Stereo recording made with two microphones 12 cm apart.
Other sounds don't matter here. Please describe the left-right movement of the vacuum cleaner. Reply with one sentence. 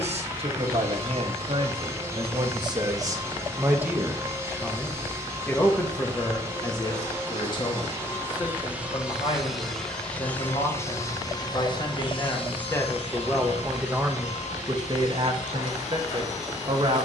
You can hear the vacuum cleaner go from the right side to the left.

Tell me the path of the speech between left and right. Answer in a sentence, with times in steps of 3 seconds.
You can hear the speech on the right from 0 s, in the centre from 3 s, on the left from 6 s, in the centre from 12 s and on the right from 15 s.